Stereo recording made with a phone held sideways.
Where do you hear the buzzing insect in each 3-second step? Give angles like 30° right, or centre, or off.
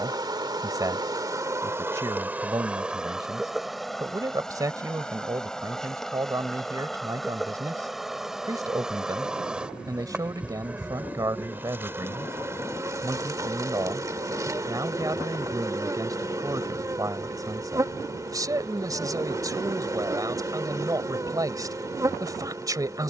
20° right, centre, centre, 10° right, 20° right, 20° right, 20° right, 20° right.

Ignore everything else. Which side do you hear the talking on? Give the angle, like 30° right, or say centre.
20° right.